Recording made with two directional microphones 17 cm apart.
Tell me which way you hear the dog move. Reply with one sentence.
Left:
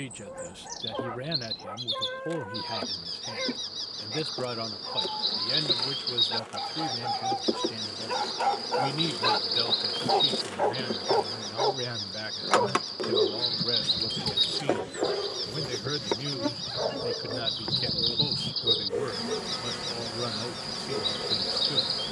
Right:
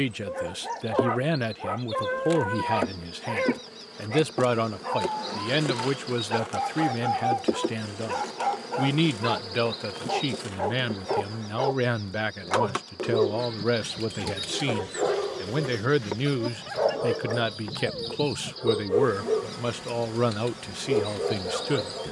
In this clip you hear the dog move from right to left and back again.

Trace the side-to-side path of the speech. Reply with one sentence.
In this clip you hear the speech stay in one place.